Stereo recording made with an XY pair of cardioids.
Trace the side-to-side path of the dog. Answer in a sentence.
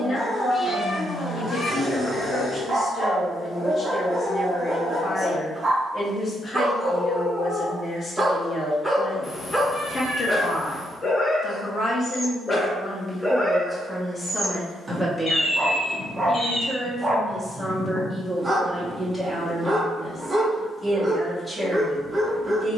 In this clip you hear the dog move from right to left and back again.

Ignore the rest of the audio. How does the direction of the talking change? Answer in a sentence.
In this clip you hear the talking move from left to right.